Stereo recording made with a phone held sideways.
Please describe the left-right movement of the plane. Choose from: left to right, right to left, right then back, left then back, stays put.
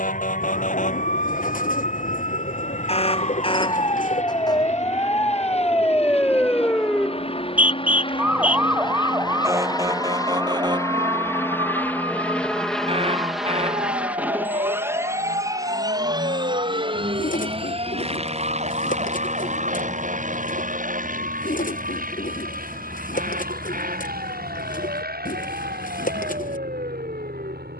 left to right.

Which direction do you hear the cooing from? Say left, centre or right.
left.